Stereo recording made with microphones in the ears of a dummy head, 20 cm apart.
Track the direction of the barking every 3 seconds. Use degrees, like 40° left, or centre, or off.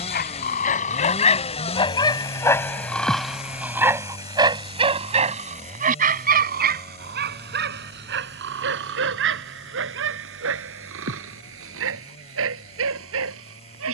30° left, 20° right, 50° right, 70° right, 70° right.